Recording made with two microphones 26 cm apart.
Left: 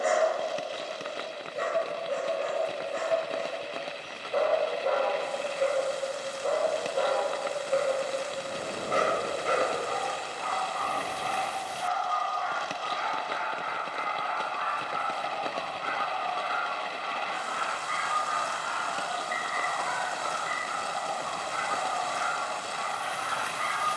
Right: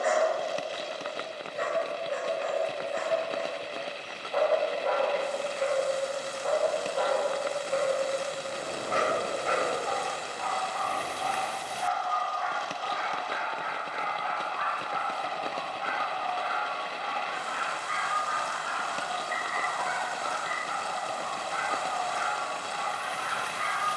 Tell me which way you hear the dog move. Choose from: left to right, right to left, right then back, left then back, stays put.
stays put.